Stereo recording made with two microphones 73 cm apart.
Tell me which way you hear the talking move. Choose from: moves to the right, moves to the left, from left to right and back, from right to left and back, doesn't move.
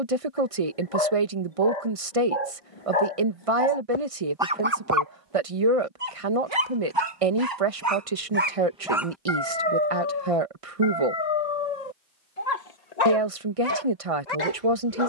doesn't move.